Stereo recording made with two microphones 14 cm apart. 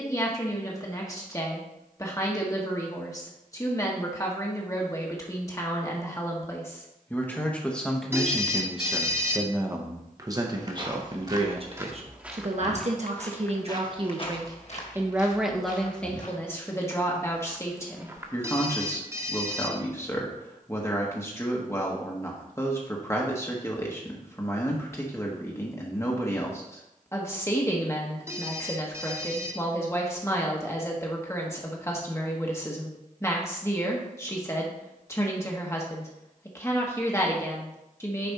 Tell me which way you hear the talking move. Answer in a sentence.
You can hear the talking move from left to right and back again.